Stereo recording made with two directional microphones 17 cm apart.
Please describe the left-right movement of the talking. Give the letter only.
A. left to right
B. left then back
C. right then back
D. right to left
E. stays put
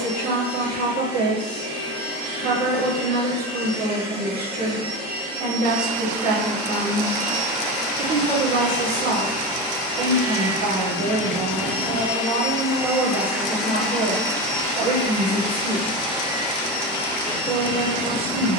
E.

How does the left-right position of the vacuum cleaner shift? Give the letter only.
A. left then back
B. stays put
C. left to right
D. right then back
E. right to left
E.